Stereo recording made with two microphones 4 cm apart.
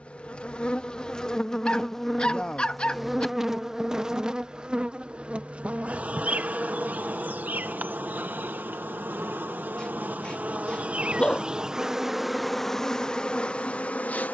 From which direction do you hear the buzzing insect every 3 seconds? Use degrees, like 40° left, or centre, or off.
20° left, 20° right, 40° right, 40° right, 20° left.